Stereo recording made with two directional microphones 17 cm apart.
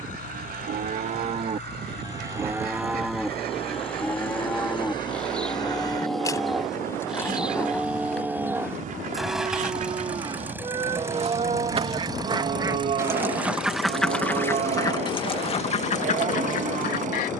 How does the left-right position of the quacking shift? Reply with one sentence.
You can hear the quacking move to the left.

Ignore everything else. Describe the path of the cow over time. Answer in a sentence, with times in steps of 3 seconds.
You can hear the cow on the right from 0 s, in the centre from 3 s and on the right from 9 s.